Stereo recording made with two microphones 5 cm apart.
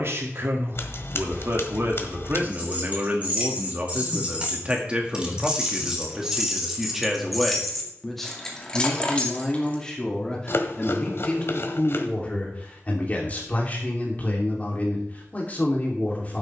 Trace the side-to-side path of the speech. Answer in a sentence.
You can hear the speech move from right to left.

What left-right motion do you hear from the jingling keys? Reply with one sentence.
You can hear the jingling keys go from the right side to the left.